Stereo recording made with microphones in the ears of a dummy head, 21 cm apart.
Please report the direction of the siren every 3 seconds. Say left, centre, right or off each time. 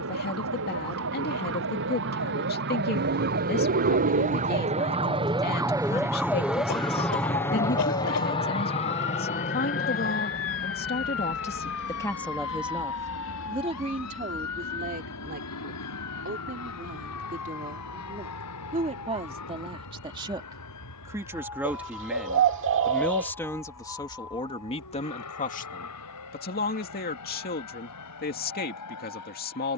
right, right, left, left, left, left, left, left, left, left.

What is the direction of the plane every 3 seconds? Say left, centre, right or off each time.
right, right, centre, left, left, left, left, left, left, left.